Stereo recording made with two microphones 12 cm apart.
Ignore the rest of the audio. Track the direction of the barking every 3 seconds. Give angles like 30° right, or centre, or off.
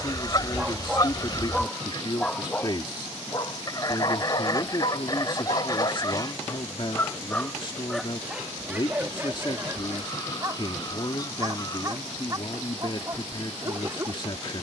centre, 50° left, 10° left, 20° right, 30° right.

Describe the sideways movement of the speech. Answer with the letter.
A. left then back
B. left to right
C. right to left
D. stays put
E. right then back
D.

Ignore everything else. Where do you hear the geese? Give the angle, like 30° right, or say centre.
30° left.